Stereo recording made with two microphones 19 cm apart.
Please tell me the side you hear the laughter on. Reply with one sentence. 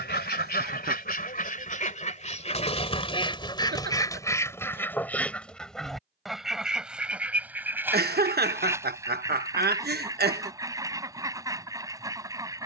You can hear the laughter on the right.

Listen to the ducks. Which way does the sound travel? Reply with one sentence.
In this clip you hear the ducks move from left to right.